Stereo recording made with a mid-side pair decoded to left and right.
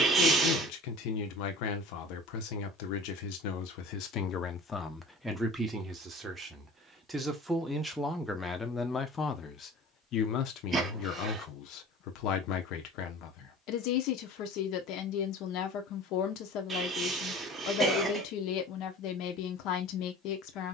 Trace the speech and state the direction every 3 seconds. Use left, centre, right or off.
left, left, centre, left, left, left, left.